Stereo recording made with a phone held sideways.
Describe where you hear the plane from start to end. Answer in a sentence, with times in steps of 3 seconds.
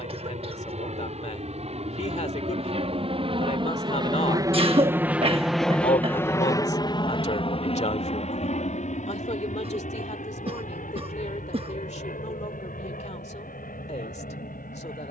You can hear the plane on the right from 0 s and on the left from 6 s.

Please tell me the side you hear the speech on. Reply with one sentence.
In this clip you hear the speech on the left.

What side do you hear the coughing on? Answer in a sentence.
You can hear the coughing on the right.